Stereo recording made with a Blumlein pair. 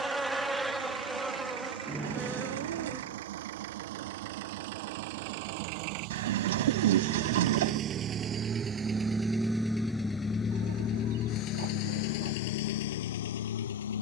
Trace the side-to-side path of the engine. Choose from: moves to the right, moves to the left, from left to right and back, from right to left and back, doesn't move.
moves to the left.